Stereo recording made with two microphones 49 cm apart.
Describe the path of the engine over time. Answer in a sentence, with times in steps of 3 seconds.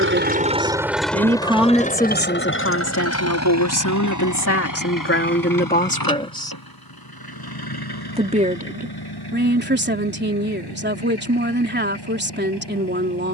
In this clip you hear the engine in the centre from 0 s and on the left from 3 s.